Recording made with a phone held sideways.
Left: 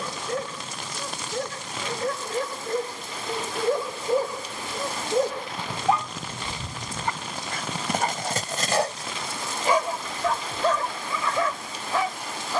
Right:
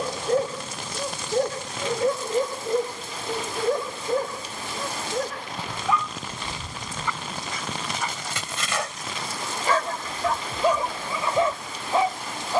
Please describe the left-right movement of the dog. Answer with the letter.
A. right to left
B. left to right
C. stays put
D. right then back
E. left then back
E.